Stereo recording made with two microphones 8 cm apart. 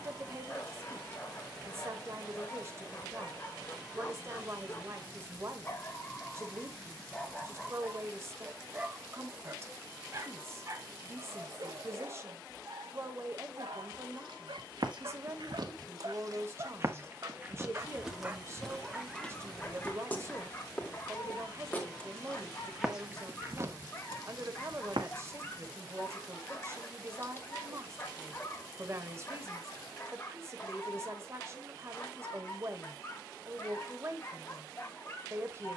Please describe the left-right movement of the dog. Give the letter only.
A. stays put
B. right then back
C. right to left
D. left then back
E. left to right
B.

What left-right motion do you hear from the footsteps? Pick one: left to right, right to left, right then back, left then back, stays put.
left then back.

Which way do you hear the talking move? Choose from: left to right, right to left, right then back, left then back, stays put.
stays put.